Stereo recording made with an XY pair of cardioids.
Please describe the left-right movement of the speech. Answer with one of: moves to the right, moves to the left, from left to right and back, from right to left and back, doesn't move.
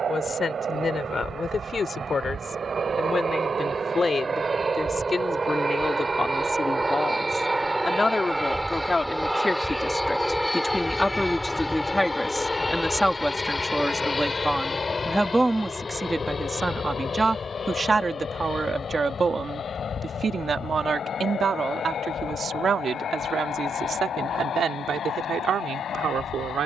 moves to the right.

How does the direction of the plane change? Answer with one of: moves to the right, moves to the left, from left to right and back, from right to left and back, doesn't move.
moves to the left.